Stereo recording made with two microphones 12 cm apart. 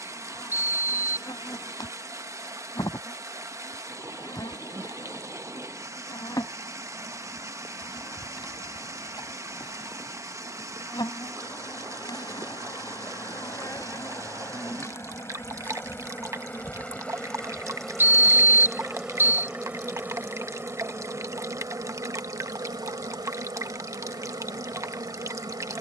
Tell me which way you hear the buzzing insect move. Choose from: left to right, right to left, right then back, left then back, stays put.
left to right.